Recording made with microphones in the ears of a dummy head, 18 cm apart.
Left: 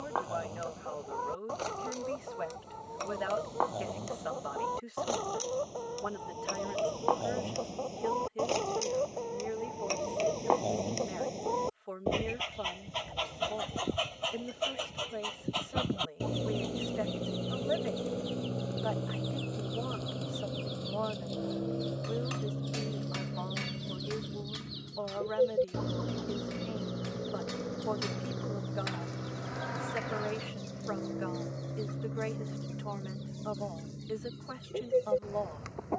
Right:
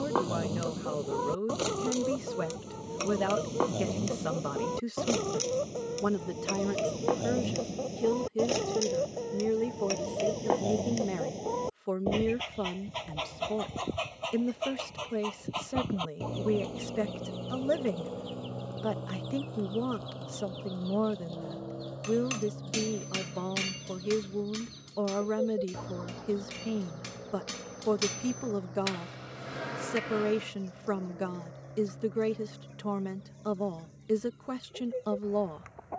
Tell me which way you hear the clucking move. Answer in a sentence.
In this clip you hear the clucking go from the right side to the left.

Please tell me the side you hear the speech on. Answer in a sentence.
You can hear the speech on the right.